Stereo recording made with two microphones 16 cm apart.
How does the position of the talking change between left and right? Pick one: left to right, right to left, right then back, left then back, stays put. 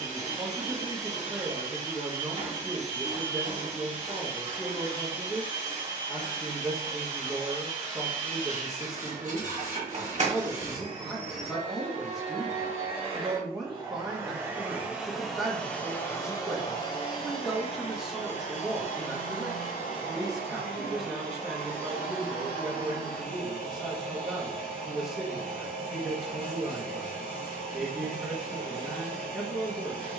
stays put.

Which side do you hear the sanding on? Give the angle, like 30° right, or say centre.
50° right.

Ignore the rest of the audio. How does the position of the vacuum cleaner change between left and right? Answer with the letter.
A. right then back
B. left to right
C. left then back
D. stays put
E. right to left
E.